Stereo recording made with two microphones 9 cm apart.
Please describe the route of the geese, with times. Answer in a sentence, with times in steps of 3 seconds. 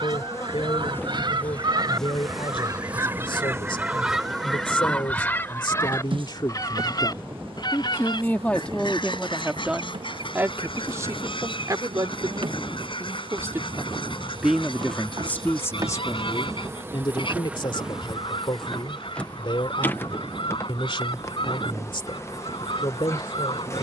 You can hear the geese on the right from 0 s, in the centre from 3 s and on the left from 6 s.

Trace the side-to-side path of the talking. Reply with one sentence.
In this clip you hear the talking move from left to right and back again.